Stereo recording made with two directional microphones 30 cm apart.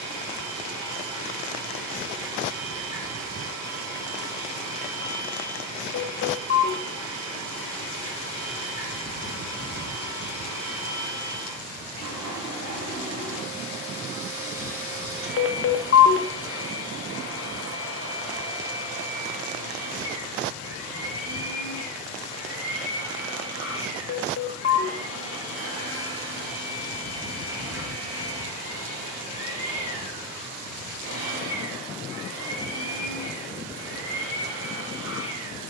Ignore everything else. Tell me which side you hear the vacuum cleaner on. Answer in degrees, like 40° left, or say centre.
60° right.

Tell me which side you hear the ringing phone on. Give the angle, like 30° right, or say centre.
40° left.